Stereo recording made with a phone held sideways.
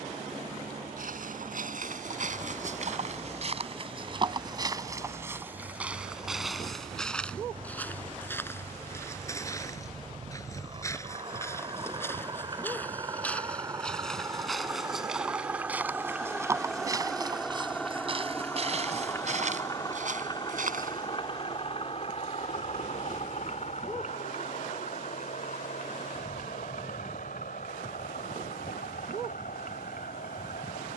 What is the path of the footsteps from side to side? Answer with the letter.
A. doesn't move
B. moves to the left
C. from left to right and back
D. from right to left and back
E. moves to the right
D.